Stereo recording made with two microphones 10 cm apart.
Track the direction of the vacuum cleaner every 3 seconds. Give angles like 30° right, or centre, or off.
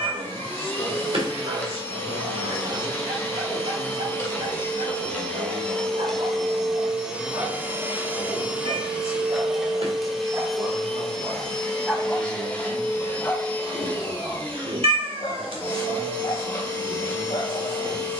20° left, 20° left, 10° right, centre, 10° left, 20° left.